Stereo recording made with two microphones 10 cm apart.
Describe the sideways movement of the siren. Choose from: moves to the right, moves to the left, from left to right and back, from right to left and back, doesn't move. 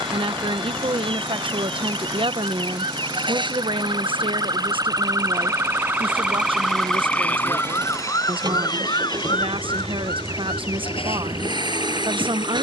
moves to the left.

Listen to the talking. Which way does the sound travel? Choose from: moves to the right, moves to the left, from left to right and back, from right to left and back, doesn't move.
doesn't move.